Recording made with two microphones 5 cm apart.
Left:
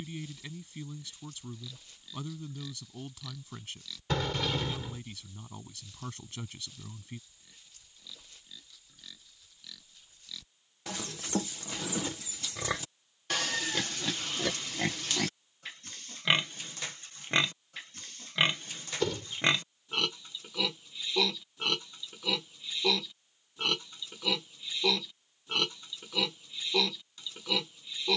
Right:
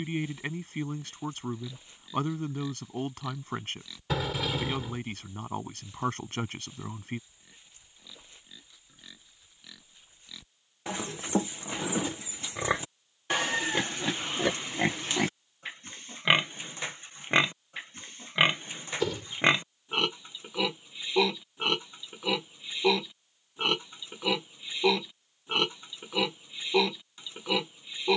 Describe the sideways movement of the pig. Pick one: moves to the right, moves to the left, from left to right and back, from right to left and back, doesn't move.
doesn't move.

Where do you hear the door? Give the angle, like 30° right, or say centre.
10° right.